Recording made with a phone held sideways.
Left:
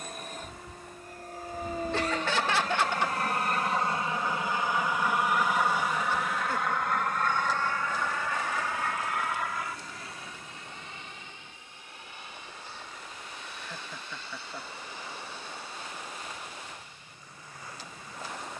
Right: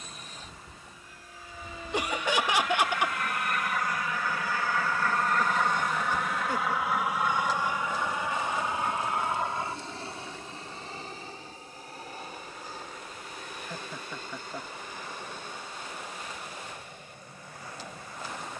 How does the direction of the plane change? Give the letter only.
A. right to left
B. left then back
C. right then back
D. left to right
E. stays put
D.